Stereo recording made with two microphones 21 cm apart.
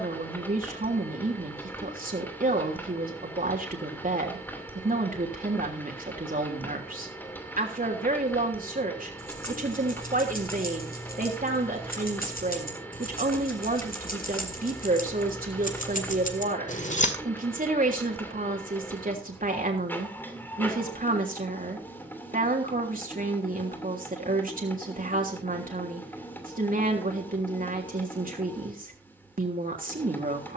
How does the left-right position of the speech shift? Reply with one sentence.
In this clip you hear the speech stay put.